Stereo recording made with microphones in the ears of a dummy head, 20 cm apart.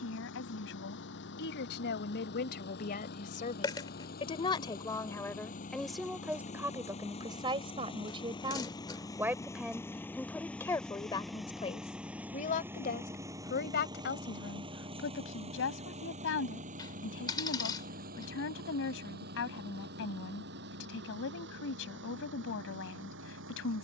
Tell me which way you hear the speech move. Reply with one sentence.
In this clip you hear the speech go right and come back.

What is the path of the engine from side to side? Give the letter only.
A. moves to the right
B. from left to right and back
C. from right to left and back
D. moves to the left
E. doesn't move
A.